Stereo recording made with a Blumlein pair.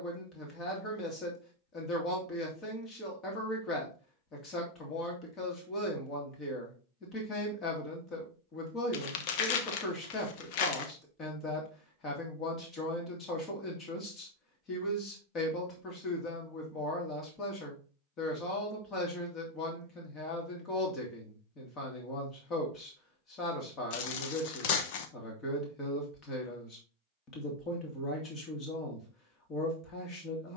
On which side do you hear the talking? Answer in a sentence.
In this clip you hear the talking on the left.